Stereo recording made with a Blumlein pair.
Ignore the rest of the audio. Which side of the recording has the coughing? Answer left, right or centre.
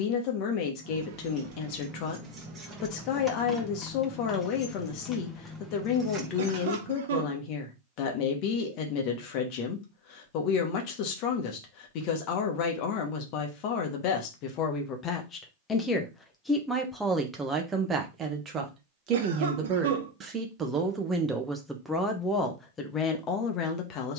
right.